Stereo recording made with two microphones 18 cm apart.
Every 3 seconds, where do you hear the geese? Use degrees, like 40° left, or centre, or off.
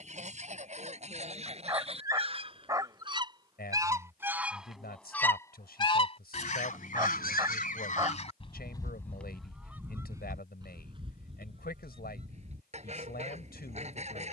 40° right, centre, 50° left, 20° right, 40° right.